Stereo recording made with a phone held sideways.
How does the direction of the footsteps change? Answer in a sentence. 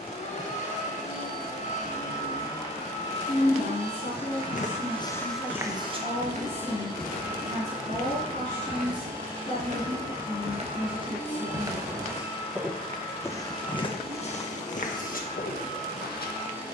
You can hear the footsteps move from left to right and back again.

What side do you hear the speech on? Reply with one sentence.
You can hear the speech on the left.